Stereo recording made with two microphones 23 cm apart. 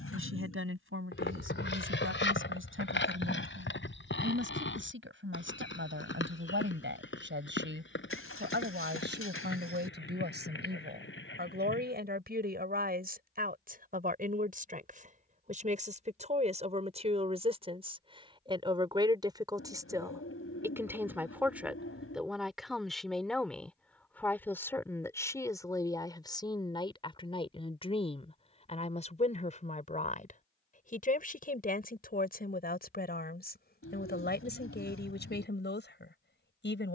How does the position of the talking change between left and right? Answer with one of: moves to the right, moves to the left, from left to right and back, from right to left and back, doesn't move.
moves to the left.